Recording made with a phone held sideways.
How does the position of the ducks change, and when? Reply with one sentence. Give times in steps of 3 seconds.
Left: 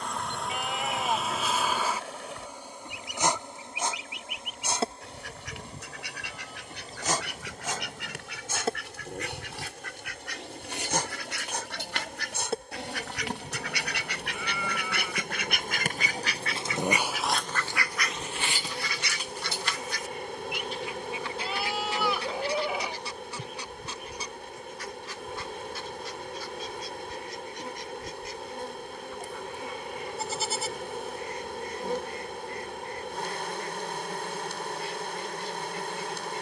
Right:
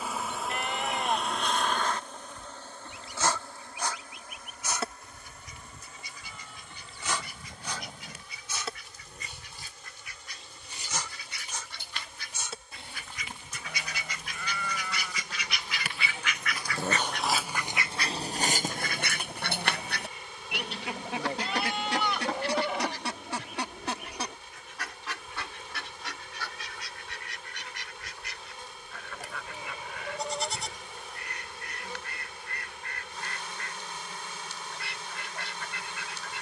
In this clip you hear the ducks on the left from 0 s and on the right from 18 s.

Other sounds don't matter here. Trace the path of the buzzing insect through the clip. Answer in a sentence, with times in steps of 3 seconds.
In this clip you hear the buzzing insect in the centre from 0 s and on the left from 3 s.